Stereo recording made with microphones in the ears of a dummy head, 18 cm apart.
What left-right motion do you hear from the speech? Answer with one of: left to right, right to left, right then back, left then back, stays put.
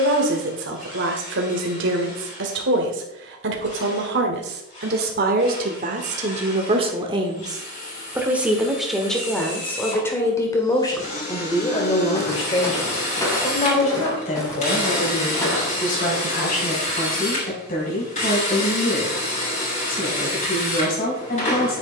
right to left.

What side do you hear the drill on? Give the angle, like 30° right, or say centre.
30° left.